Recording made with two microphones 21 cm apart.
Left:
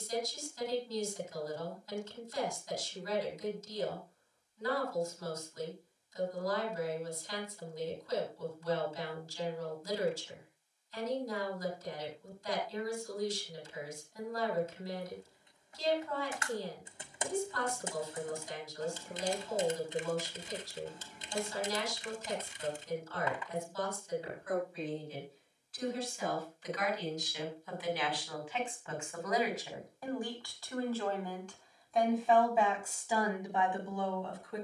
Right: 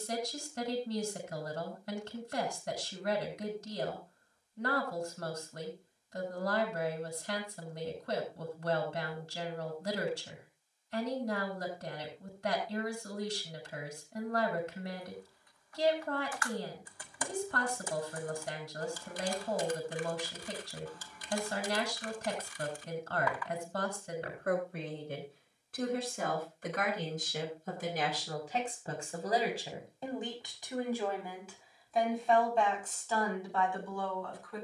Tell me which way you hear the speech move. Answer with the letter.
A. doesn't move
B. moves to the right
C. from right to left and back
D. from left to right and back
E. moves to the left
E.